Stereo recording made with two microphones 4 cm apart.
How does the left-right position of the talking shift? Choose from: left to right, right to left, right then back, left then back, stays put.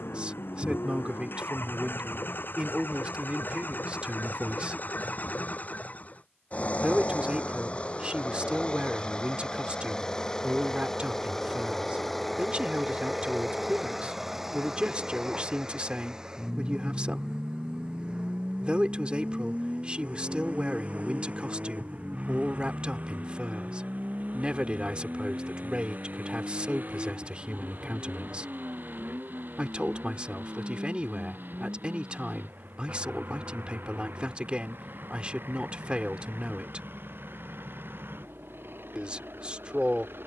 stays put.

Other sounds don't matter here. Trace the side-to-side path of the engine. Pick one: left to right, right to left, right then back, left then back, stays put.
left to right.